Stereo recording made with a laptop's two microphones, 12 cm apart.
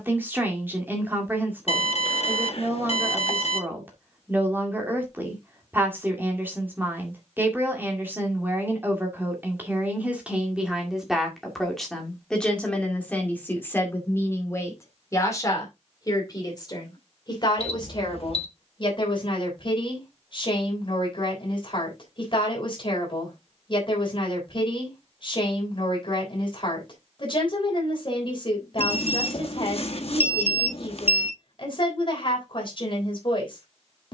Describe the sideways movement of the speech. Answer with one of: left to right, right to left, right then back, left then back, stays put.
right to left.